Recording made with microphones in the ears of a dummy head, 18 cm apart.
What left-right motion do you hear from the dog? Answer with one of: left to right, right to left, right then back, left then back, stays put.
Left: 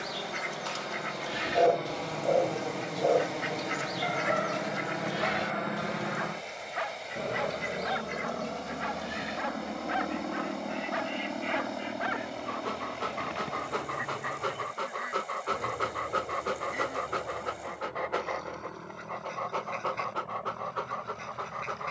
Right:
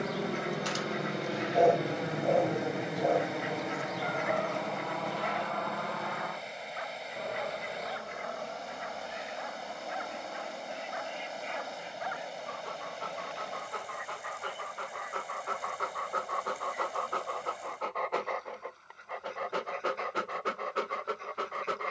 left then back.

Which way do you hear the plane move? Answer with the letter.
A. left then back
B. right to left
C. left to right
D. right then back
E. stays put
B.